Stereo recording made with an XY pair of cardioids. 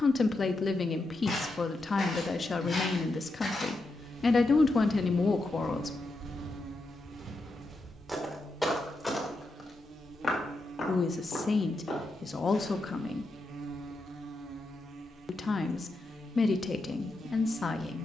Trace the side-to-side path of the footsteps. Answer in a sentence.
In this clip you hear the footsteps go right and come back.